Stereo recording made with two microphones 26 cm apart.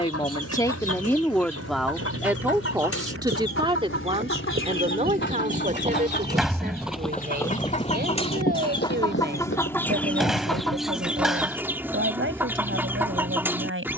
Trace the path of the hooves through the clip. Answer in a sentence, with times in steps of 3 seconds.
You can hear the hooves on the right from 0 s, in the centre from 6 s, on the left from 9 s and not at all from 12 s.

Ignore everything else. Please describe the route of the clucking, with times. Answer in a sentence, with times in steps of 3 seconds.
In this clip you hear the clucking on the left from 0 s and in the centre from 9 s.